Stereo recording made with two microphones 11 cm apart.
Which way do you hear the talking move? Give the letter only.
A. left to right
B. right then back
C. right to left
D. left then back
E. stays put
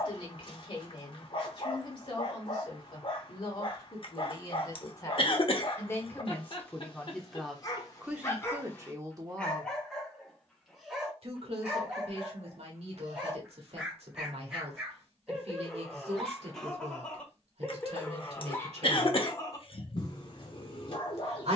A.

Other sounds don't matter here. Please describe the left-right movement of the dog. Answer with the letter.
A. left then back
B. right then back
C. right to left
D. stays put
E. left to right
B.